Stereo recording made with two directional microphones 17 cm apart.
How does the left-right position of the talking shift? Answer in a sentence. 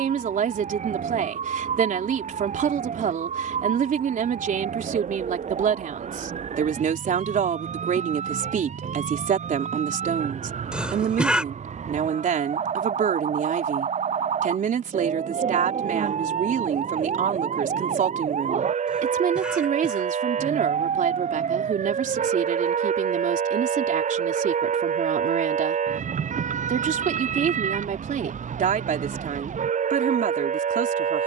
You can hear the talking stay in one place.